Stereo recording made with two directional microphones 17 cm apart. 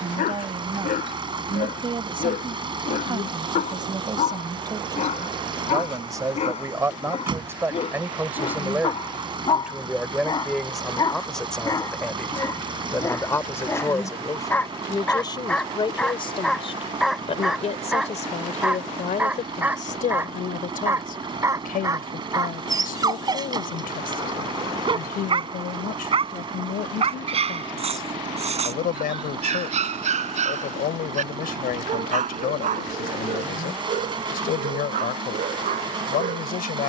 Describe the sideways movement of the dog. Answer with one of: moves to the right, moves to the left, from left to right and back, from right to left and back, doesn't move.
moves to the right.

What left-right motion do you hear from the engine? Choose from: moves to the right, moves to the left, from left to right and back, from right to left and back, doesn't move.
doesn't move.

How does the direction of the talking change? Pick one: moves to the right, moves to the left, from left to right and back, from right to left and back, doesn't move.
moves to the left.